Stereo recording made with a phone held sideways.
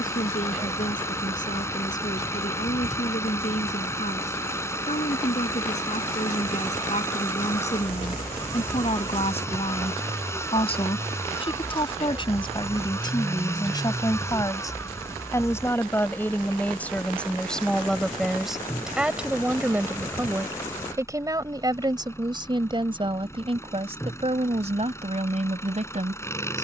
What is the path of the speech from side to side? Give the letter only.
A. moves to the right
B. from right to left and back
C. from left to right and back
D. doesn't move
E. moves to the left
A.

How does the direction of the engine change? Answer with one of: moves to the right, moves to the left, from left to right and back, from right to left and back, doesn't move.
doesn't move.